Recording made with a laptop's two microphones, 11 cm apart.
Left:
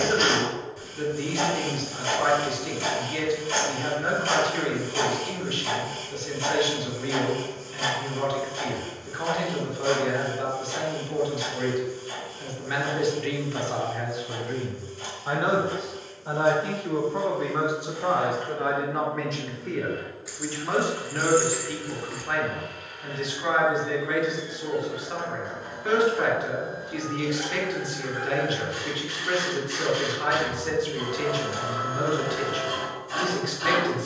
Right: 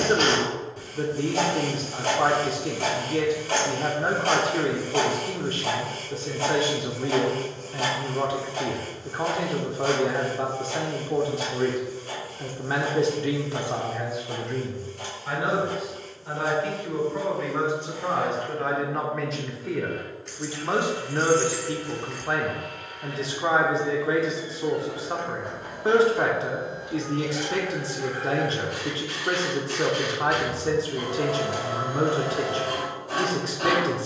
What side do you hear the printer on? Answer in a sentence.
In this clip you hear the printer on the right.